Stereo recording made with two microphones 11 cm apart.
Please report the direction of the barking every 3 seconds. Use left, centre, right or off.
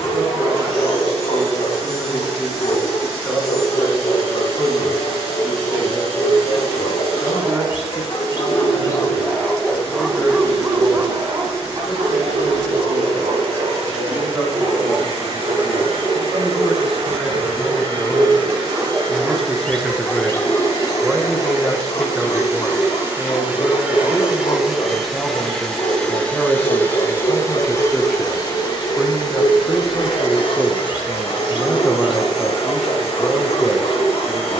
left, left, left, centre, right, right, centre, left, left, left, left, left.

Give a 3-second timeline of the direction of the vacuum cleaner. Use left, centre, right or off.
right, right, right, right, right, right, right, right, centre, left, left, left.